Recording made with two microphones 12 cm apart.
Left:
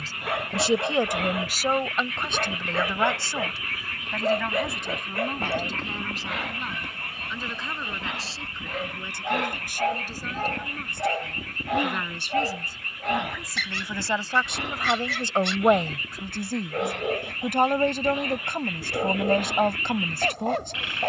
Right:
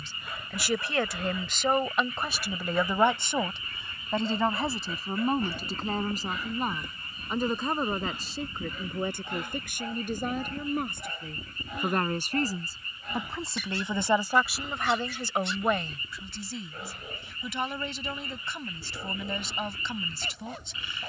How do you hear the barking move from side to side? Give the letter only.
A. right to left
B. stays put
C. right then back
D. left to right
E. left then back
B.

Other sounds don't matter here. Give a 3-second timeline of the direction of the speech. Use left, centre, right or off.
centre, right, right, right, right, left, left.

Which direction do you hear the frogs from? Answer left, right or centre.
left.